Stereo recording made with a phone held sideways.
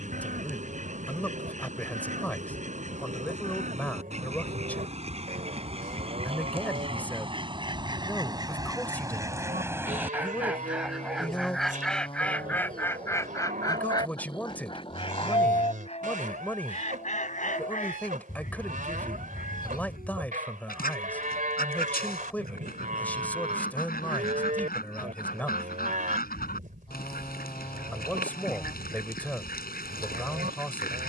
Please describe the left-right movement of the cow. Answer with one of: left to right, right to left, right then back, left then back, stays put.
stays put.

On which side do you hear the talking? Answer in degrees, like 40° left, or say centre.
10° left.